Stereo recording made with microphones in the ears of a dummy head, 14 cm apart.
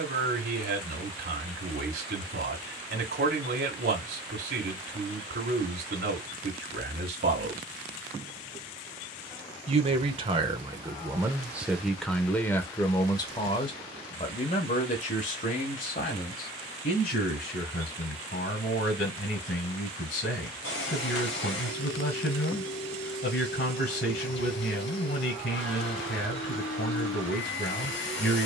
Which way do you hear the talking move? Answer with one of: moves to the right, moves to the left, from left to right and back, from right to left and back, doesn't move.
moves to the left.